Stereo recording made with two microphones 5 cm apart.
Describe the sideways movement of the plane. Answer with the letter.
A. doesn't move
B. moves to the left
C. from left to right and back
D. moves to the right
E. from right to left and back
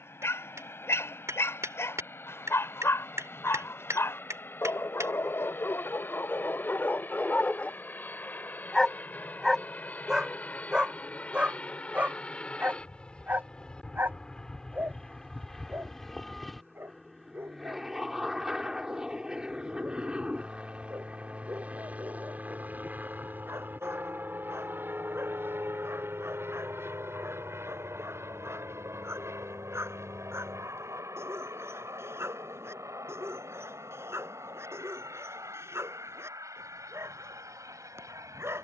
D.